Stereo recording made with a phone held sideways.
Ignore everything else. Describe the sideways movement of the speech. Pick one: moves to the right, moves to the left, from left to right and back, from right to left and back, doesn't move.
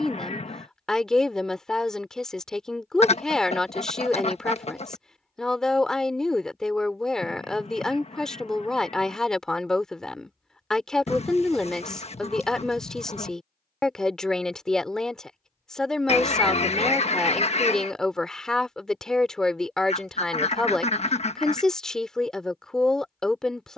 doesn't move.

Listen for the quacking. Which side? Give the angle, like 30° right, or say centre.
40° left.